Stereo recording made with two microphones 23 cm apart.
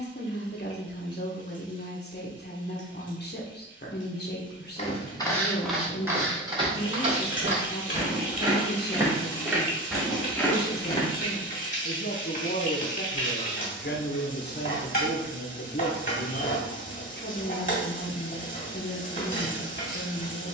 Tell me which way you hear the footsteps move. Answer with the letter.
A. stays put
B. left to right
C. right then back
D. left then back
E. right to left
C.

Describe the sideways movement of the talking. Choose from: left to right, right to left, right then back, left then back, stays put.
stays put.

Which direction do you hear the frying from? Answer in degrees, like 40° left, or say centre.
30° left.